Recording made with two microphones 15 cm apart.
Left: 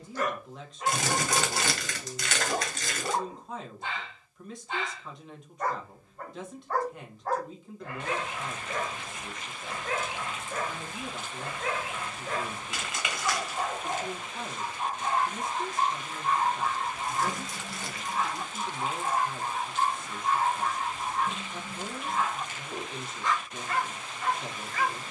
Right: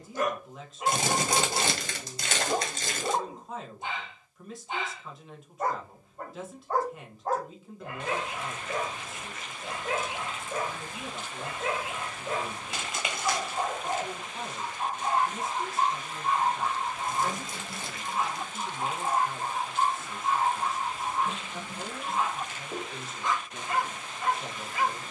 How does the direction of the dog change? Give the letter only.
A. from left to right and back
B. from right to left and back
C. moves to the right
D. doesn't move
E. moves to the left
D.